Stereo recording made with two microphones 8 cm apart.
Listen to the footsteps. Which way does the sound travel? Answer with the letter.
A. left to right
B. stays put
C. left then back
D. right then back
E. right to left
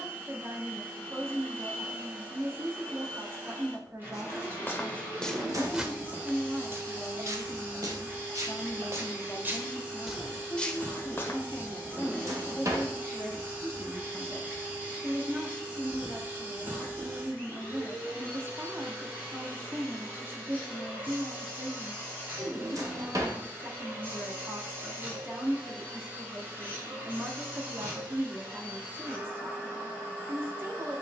D.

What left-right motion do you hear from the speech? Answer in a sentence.
You can hear the speech move from right to left and back again.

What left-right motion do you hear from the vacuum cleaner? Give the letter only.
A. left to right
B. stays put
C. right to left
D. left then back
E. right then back
B.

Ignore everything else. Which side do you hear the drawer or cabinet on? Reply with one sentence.
You can hear the drawer or cabinet on the right.